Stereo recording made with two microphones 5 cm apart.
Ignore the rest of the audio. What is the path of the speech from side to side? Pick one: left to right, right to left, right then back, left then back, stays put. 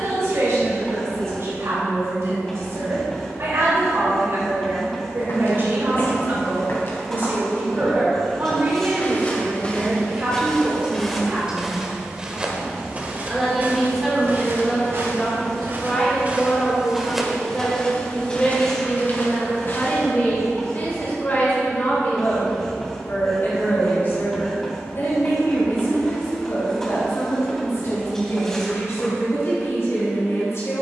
right to left.